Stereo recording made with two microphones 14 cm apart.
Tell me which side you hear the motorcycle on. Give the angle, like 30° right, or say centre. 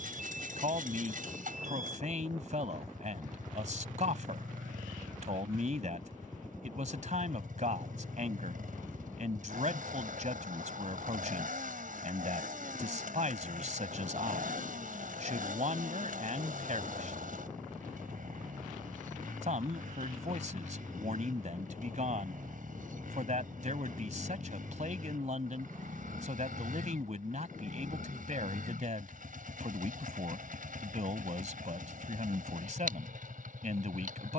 70° right.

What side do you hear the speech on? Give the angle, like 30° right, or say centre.
60° right.